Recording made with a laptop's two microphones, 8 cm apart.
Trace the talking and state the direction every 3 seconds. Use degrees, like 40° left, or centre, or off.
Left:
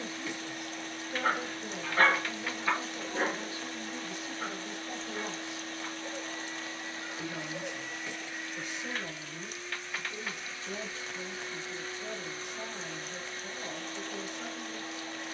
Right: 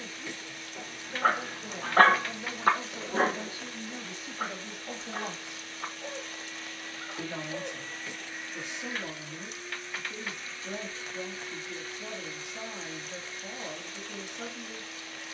centre, 40° right, 70° right, 70° right, 70° right.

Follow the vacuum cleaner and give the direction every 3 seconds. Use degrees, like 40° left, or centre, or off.
50° left, 50° left, 20° left, 10° left, 40° left.